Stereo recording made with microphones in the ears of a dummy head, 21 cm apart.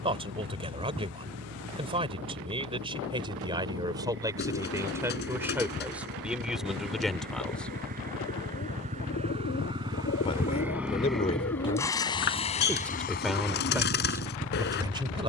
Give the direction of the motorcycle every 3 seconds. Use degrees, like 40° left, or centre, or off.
50° right, 50° right, 40° right, 10° right, 40° left.